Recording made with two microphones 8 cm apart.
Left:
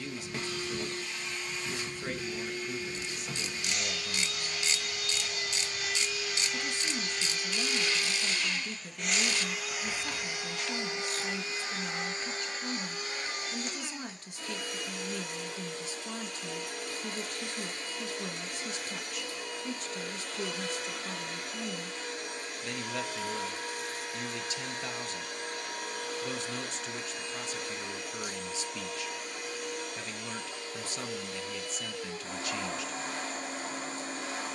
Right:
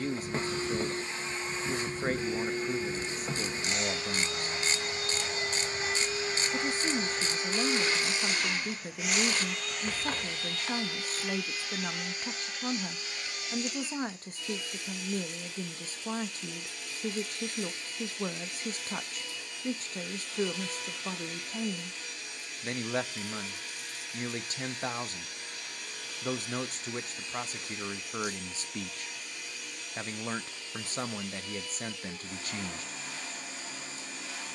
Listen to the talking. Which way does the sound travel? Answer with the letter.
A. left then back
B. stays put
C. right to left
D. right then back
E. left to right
B.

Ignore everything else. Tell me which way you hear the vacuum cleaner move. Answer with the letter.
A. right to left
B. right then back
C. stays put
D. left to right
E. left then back
A.